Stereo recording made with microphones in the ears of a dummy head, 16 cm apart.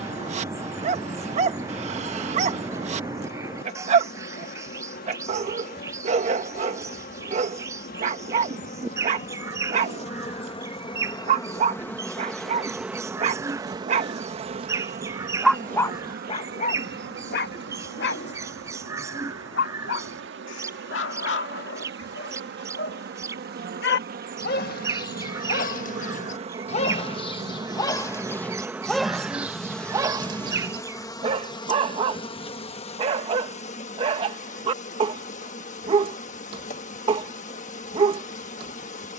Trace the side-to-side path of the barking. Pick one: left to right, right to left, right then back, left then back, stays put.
left then back.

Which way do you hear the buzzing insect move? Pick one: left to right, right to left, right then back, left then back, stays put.
right then back.